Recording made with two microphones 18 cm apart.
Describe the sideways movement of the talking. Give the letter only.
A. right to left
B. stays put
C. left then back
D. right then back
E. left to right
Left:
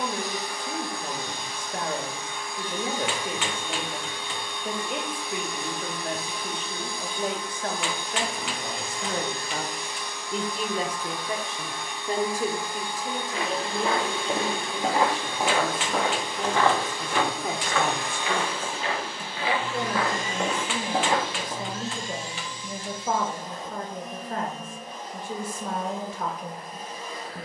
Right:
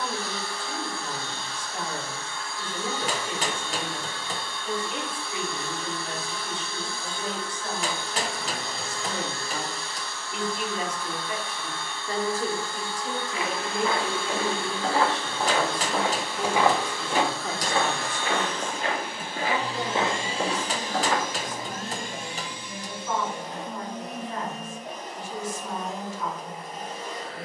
D.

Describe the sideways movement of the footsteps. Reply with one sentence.
In this clip you hear the footsteps go right and come back.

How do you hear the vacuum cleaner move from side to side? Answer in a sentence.
You can hear the vacuum cleaner move from left to right.